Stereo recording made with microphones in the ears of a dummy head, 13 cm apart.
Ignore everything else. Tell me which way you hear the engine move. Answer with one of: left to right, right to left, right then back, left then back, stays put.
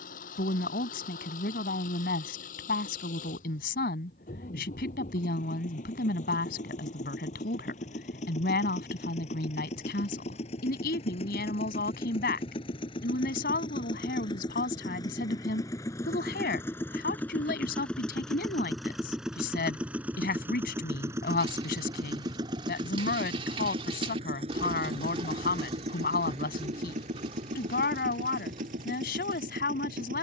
left to right.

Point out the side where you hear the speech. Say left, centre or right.
left.